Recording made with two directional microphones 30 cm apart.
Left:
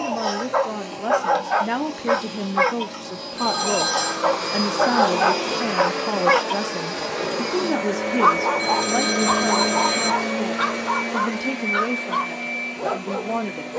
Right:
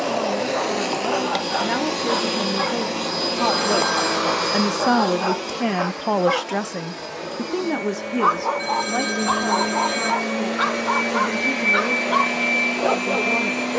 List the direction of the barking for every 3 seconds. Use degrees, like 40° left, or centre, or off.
60° left, 60° left, 30° left, centre, 20° right.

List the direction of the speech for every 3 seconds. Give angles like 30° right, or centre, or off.
10° left, 10° right, 10° right, 10° left, 10° left.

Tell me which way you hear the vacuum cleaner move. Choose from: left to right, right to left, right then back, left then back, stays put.
left then back.